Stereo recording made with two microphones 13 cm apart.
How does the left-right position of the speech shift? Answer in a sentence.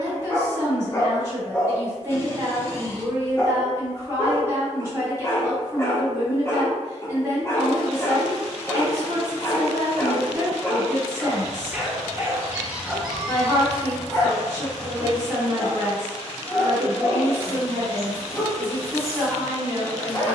You can hear the speech stay put.